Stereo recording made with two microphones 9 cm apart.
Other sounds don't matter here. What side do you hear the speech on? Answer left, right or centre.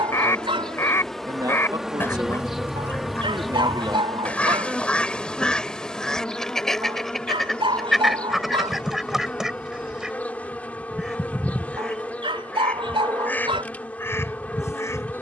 right.